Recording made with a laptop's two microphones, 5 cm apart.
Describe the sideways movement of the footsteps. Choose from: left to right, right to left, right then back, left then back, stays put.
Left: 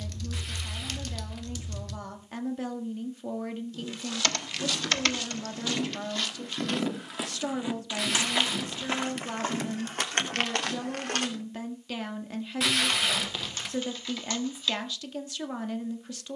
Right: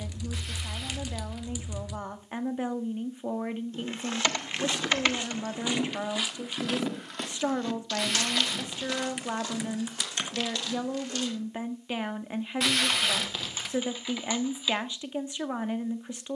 right to left.